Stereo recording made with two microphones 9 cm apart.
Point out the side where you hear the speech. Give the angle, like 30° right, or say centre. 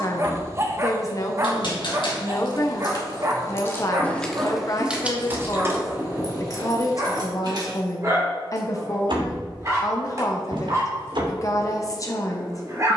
40° left.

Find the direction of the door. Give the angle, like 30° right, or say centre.
60° right.